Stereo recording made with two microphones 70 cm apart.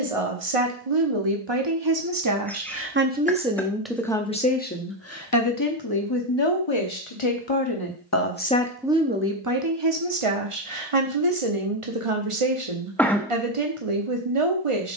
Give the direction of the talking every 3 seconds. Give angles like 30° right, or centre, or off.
40° right, 10° left, 30° left, 40° right, 50° right.